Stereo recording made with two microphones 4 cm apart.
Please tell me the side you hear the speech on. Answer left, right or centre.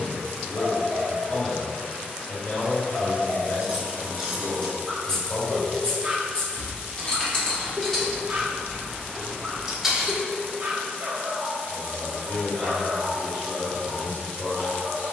left.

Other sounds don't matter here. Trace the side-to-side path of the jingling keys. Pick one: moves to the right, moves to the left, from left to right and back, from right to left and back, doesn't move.
from right to left and back.